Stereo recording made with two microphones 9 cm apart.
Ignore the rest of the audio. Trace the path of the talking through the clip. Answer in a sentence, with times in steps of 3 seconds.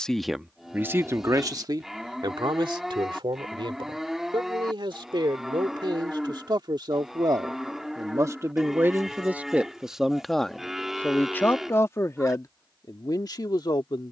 You can hear the talking on the right from 0 s, in the centre from 9 s and on the left from 12 s.